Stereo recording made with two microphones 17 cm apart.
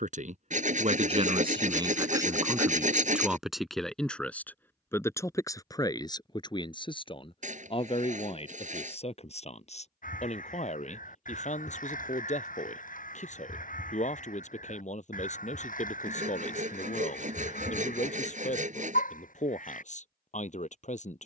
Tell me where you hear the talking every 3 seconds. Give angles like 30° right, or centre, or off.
30° right, 10° left, 30° left, 40° left, 50° left, 50° left, 50° left.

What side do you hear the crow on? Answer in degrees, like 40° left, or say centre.
50° left.